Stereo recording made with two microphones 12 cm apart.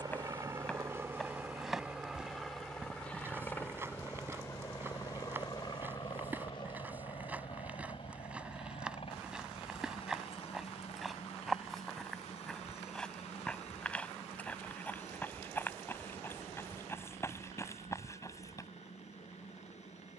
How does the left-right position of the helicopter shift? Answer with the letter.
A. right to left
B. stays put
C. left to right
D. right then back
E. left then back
A.